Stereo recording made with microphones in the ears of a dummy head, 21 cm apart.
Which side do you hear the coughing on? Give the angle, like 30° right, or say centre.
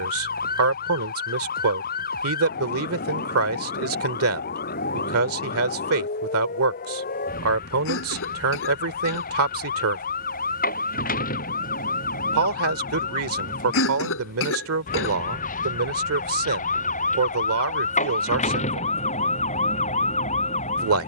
60° left.